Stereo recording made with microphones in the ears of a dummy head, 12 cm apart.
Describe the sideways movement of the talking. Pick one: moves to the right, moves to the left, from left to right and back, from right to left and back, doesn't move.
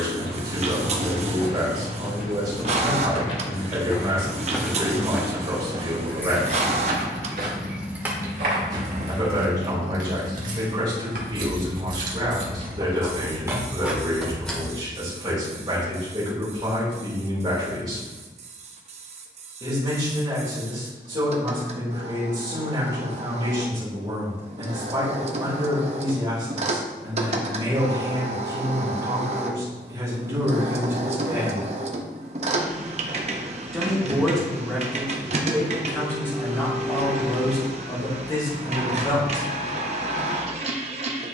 moves to the left.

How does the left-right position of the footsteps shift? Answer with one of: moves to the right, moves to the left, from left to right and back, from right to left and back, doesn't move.
moves to the right.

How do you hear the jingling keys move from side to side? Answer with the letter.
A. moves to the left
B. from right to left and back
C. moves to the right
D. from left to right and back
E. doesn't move
D.